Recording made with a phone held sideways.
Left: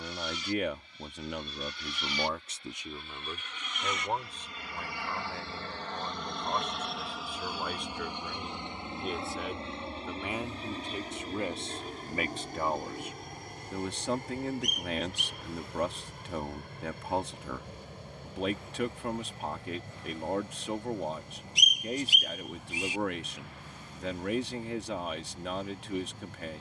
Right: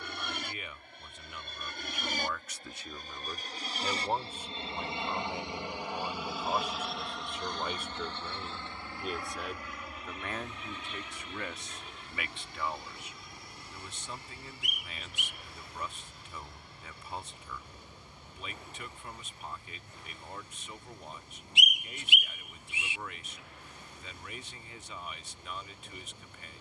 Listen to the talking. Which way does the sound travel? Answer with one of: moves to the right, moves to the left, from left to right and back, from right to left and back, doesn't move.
from left to right and back.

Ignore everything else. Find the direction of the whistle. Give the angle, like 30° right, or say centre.
40° left.